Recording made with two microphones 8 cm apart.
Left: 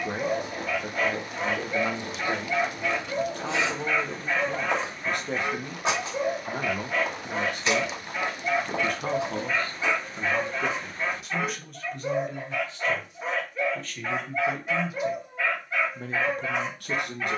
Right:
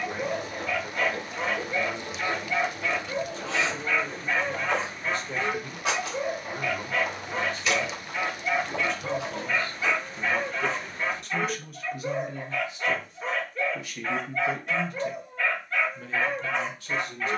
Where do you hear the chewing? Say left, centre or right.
left.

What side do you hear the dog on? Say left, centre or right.
centre.